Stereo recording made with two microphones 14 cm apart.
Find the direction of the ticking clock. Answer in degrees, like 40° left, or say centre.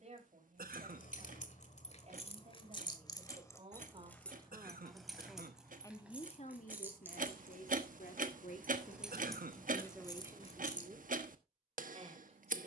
60° right.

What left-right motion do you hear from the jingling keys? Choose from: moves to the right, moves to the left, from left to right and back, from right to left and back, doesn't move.
from left to right and back.